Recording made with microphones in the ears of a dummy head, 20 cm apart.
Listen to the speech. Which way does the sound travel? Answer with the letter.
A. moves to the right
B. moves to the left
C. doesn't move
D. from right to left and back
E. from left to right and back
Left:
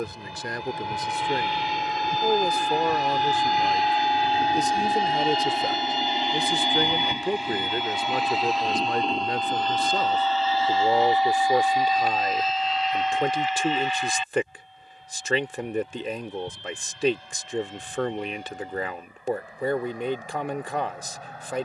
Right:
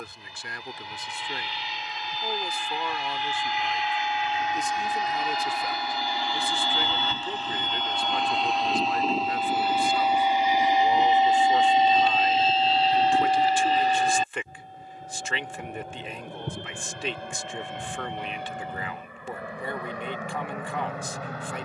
C.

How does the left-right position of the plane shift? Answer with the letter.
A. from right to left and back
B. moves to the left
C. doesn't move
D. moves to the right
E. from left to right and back
D.